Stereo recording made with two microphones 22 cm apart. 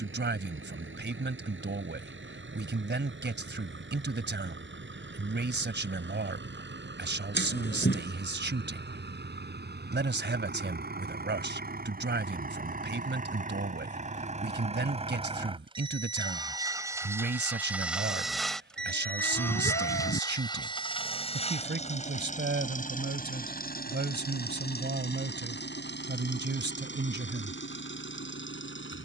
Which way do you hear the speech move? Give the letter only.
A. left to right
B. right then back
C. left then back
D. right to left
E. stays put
E.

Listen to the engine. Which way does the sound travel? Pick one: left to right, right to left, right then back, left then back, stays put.
right to left.